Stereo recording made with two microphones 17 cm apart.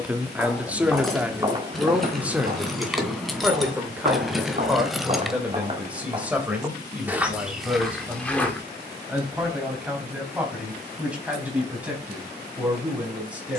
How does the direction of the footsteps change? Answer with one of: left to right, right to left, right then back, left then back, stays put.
right then back.